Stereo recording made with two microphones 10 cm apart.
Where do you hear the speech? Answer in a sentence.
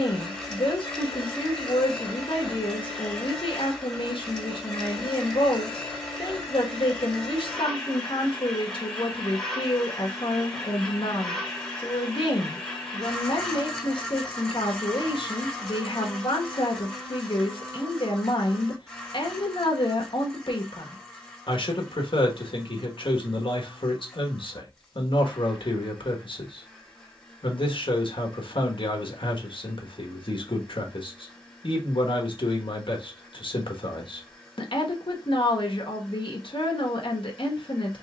In this clip you hear the speech on the left.